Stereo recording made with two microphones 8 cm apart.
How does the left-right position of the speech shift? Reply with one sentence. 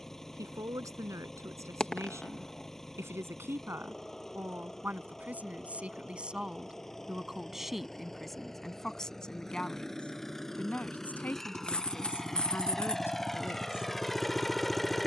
In this clip you hear the speech travel towards the left.